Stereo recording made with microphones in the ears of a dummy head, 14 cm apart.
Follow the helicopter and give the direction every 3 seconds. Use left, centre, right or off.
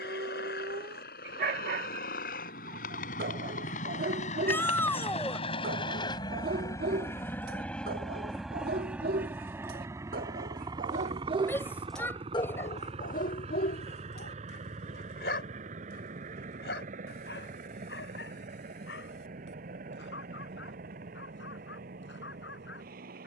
left, left, centre, right, right, right, right, right.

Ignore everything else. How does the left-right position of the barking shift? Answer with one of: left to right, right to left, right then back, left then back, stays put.
right to left.